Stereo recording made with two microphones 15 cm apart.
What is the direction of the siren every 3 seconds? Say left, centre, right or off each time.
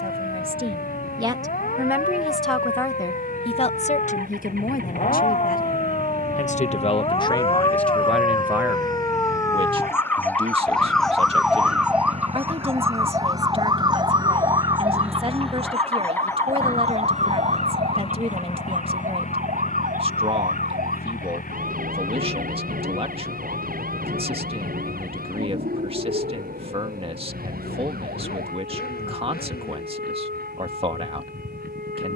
left, left, left, centre, right, right, right, right, right, right, right.